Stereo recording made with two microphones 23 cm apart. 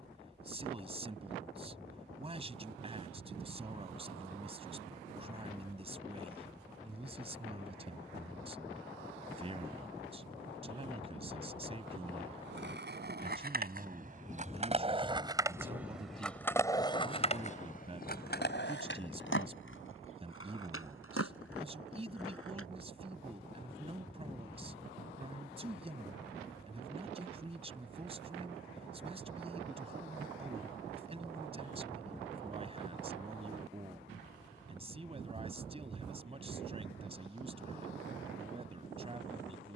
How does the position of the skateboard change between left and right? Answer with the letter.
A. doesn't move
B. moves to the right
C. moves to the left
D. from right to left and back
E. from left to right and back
C.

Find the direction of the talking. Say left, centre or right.
right.